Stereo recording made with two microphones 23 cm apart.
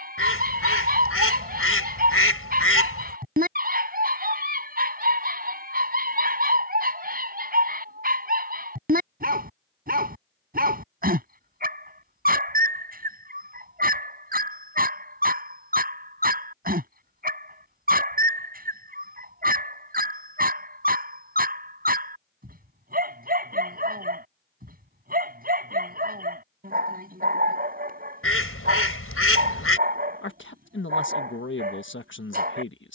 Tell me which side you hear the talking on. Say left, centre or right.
left.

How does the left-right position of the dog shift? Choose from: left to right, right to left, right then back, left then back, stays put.
stays put.